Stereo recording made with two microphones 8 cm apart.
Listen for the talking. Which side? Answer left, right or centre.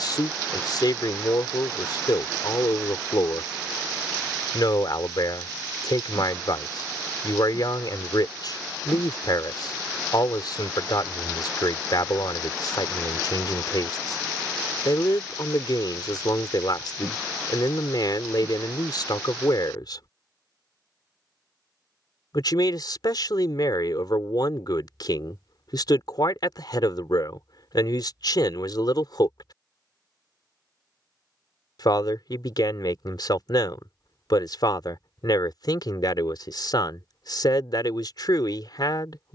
left.